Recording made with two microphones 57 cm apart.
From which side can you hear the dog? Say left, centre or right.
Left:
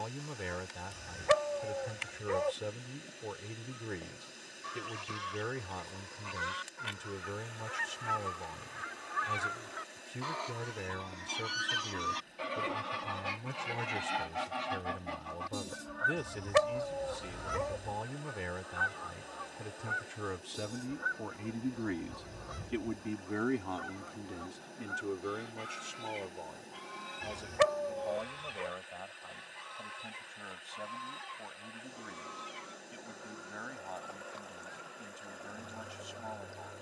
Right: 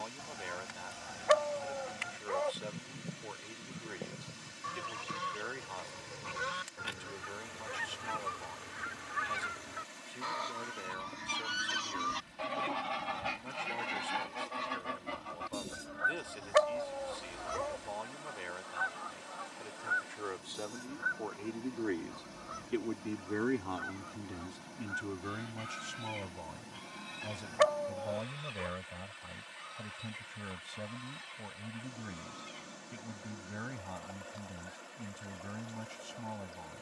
left.